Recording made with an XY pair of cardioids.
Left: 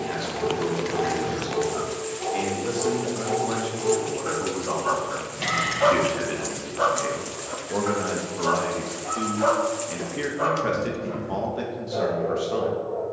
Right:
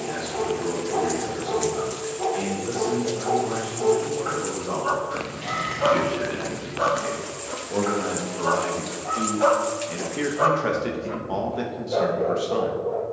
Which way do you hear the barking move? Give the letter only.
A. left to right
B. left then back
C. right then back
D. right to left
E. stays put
B.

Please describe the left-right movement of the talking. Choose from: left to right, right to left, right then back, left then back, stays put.
left to right.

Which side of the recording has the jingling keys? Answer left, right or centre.
left.